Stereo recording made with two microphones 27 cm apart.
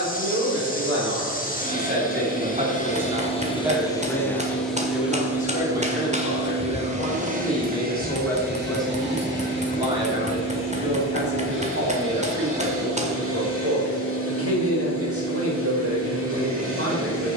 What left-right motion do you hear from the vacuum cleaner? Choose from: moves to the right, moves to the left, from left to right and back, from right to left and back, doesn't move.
moves to the right.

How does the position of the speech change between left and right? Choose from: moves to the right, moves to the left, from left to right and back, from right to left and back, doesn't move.
from right to left and back.